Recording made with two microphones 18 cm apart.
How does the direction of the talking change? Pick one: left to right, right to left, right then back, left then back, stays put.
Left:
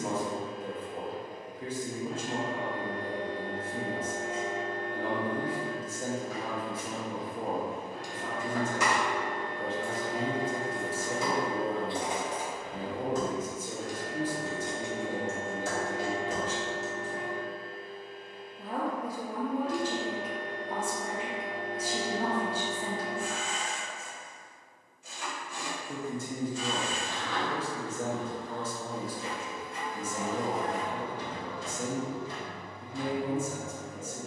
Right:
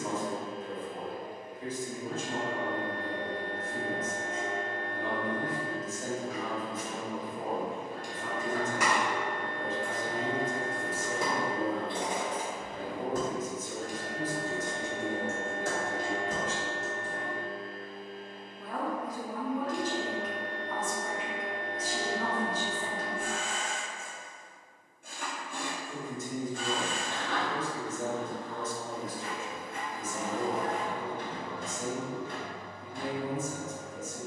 stays put.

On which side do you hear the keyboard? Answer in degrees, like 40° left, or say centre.
60° right.